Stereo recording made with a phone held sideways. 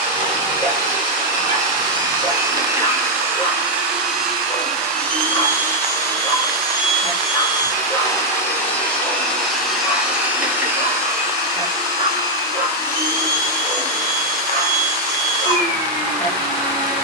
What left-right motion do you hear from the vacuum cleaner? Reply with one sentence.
You can hear the vacuum cleaner move from right to left and back again.